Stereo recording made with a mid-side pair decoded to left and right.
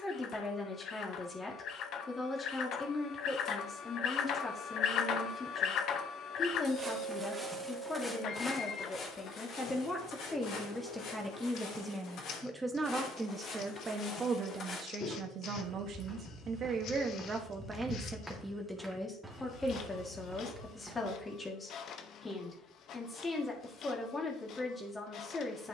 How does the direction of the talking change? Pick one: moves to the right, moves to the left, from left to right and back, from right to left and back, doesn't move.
from left to right and back.